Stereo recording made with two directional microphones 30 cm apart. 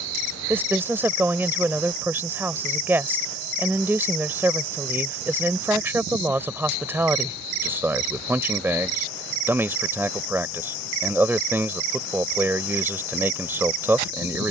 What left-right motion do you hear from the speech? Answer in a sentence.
In this clip you hear the speech stay in one place.